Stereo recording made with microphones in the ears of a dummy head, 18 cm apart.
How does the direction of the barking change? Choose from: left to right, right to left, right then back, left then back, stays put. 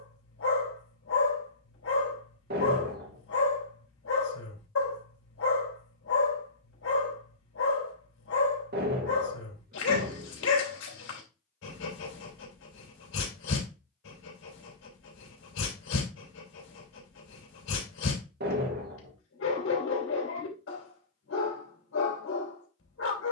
stays put.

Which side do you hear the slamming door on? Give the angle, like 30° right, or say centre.
50° right.